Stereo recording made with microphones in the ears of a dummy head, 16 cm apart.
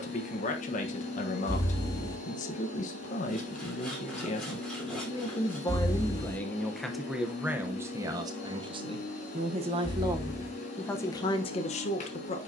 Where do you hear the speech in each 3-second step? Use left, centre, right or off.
left, left, centre, centre.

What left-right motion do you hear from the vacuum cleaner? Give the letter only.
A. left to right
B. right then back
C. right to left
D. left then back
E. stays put
E.